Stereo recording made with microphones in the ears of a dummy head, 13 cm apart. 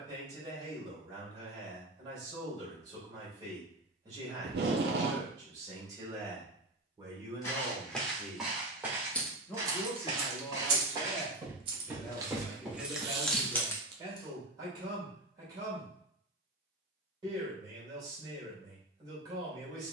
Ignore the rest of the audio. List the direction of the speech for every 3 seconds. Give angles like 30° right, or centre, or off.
30° right, 30° right, 20° right, 20° left, 10° right, 30° right, 30° right.